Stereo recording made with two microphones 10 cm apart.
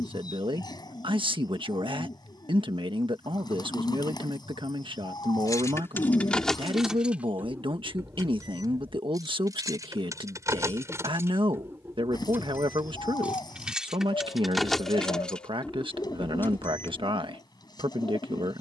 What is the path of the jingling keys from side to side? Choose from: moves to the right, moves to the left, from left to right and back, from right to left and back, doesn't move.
from left to right and back.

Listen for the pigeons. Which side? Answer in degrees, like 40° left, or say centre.
40° left.